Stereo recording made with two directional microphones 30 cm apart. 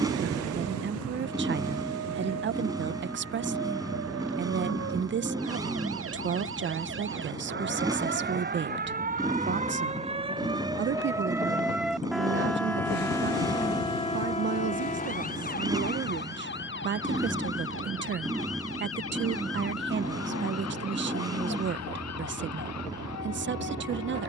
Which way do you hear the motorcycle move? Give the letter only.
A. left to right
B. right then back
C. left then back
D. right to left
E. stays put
E.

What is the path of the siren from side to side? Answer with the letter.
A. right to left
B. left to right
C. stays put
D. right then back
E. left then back
A.